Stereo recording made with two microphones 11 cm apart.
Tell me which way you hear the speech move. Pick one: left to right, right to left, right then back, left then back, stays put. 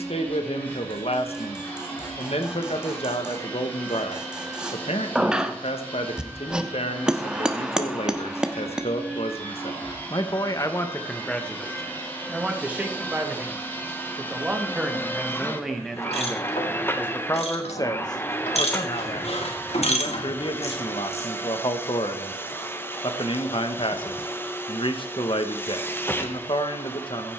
right then back.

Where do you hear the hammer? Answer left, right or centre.
centre.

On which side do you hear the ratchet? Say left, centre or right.
left.